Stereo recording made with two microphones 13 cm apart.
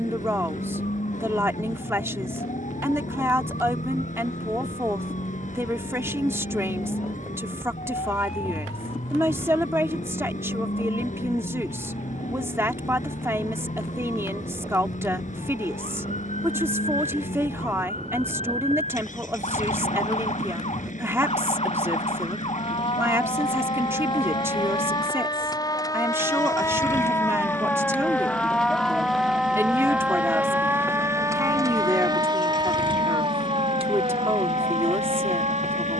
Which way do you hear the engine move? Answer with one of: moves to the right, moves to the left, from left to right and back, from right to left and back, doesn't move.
doesn't move.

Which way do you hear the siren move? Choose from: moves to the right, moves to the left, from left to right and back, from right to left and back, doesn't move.
moves to the right.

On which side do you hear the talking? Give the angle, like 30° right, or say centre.
20° right.